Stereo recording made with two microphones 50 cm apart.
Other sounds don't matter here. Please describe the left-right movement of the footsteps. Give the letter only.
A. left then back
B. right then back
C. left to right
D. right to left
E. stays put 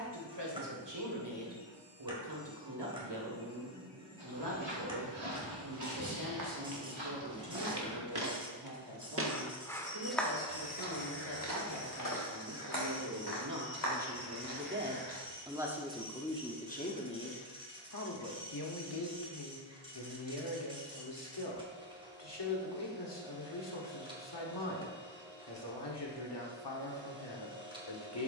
D.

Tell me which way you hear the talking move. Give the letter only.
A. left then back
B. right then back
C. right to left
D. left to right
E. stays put
C.